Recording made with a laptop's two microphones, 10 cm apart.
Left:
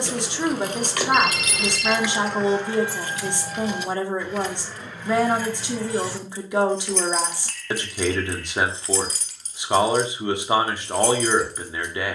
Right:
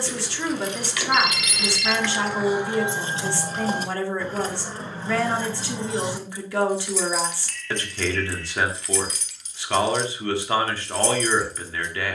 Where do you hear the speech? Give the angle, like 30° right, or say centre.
20° left.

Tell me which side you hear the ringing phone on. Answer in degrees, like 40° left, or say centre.
40° left.